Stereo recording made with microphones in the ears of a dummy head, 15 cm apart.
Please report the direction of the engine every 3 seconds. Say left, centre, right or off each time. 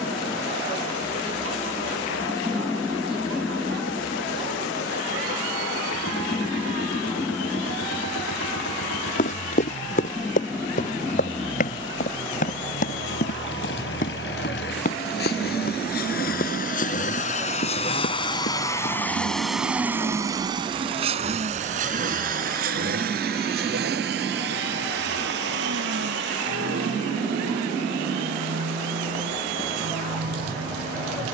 left, left, left, left, left, left, centre, right, right, right, right.